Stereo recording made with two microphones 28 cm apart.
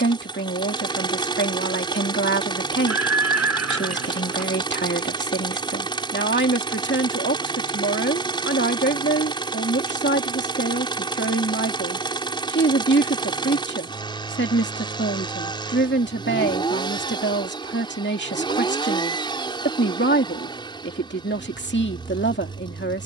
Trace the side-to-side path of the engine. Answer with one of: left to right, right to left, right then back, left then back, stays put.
stays put.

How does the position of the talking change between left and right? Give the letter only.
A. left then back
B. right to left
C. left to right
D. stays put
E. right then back
D.